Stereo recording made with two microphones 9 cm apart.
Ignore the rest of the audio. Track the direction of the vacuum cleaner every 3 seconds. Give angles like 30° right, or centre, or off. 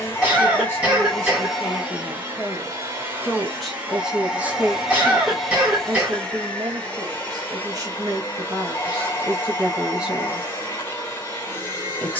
centre, 10° right, 20° left, 30° left.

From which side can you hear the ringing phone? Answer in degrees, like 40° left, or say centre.
20° left.